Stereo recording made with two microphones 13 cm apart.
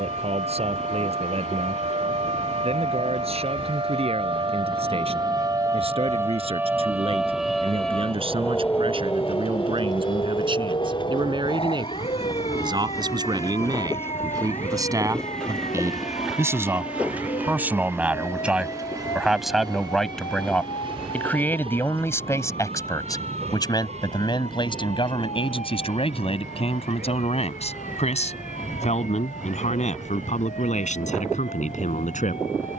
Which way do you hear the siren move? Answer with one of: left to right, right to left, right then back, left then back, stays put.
right to left.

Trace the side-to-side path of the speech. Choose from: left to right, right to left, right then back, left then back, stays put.
right to left.